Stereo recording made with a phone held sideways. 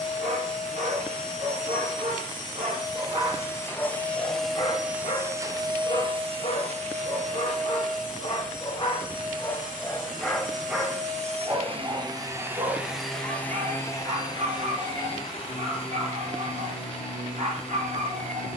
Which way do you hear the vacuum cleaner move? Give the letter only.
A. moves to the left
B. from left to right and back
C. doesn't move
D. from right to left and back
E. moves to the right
B.